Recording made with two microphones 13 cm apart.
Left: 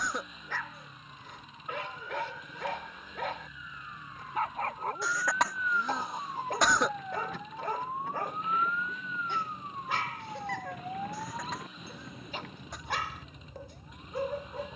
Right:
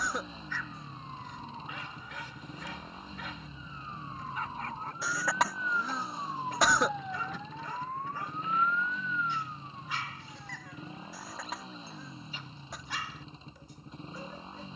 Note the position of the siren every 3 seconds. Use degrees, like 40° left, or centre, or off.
50° right, 30° right, centre, 50° left, 80° left.